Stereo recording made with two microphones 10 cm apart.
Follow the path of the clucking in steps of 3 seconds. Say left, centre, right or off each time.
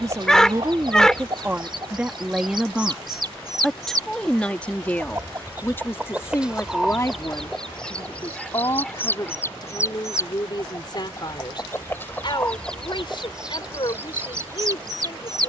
right, right, centre, left, centre.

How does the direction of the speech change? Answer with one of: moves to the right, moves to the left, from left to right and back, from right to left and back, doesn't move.
moves to the left.